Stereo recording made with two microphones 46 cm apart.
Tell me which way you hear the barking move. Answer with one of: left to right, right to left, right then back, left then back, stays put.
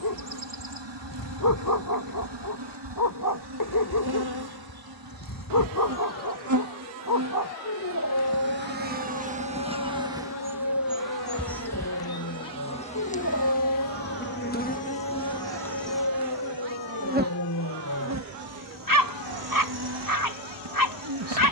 stays put.